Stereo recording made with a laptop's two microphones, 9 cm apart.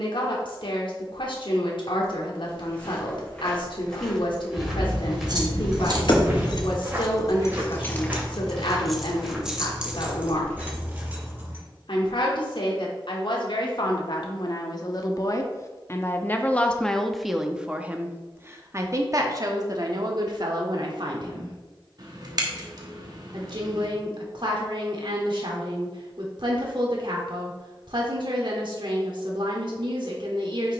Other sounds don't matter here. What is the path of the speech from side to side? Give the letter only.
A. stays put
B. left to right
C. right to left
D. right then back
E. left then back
B.